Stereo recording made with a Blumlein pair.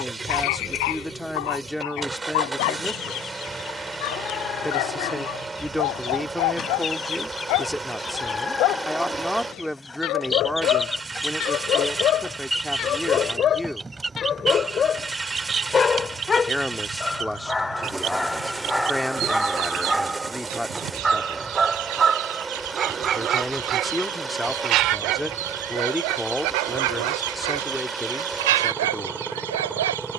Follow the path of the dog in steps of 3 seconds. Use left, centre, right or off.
left, left, left, left, left, centre, centre, right, right, right.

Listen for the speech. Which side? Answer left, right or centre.
centre.